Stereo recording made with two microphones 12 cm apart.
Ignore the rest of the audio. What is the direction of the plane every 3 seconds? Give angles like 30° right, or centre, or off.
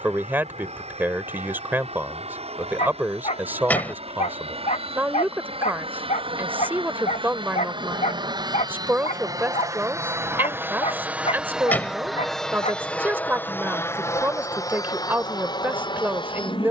70° right, 60° right, 50° right, 20° right, 20° left, 40° left.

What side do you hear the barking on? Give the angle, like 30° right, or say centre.
70° left.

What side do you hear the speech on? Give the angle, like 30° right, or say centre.
20° right.